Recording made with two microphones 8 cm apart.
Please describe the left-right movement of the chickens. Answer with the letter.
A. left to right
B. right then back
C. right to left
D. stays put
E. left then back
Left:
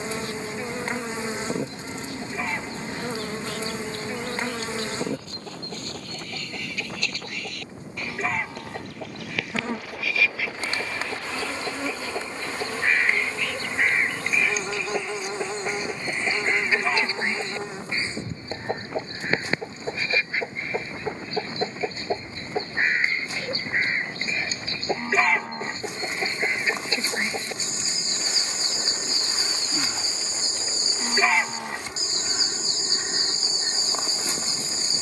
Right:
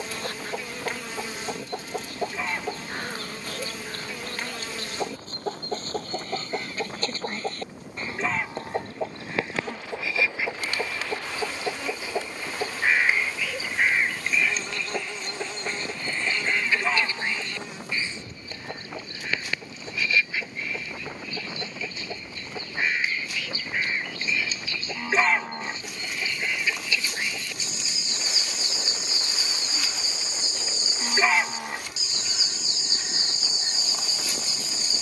C.